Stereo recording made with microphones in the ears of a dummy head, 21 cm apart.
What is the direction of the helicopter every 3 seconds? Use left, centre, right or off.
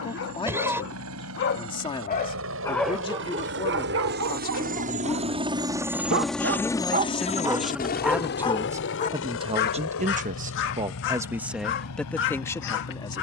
right, right, left, left, left.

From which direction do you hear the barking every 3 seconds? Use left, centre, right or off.
left, right, centre, left, left.